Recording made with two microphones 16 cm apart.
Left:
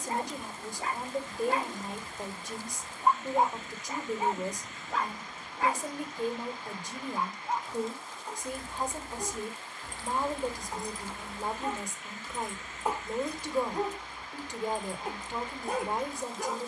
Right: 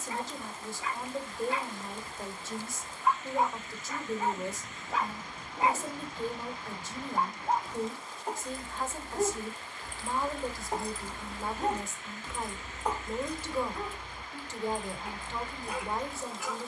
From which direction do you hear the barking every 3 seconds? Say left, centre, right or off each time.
left, centre, right, right, left, left.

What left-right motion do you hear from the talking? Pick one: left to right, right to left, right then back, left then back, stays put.
stays put.